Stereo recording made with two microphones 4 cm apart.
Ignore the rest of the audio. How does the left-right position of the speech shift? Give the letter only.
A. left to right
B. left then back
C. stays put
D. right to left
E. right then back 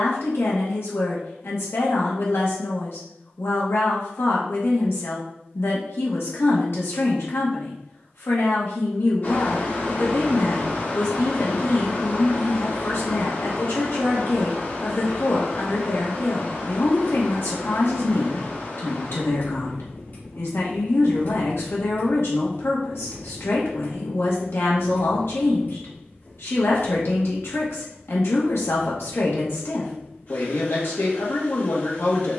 C.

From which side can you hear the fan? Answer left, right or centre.
left.